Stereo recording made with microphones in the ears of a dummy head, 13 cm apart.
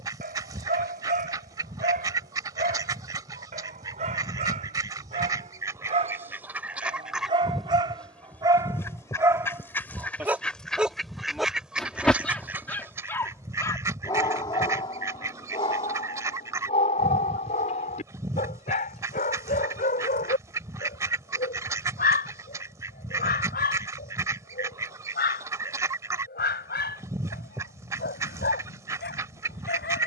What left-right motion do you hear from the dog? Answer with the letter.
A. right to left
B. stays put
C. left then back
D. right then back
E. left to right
A.